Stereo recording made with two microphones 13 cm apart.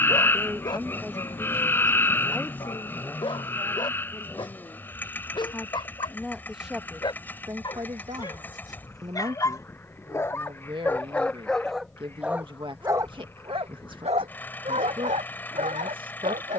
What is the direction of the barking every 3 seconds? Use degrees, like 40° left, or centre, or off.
40° left, 40° left, 40° left, 20° left, 50° right, 80° right.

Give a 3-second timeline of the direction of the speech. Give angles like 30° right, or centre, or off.
10° right, 20° left, 20° right, 40° right, 40° right, 40° right.